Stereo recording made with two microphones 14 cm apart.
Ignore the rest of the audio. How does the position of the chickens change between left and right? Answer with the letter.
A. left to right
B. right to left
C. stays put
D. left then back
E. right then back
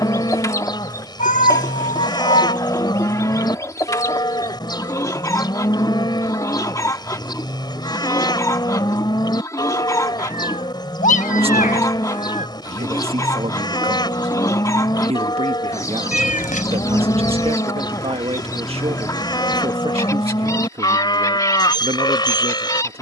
C.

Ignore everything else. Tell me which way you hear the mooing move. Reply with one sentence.
In this clip you hear the mooing stay in one place.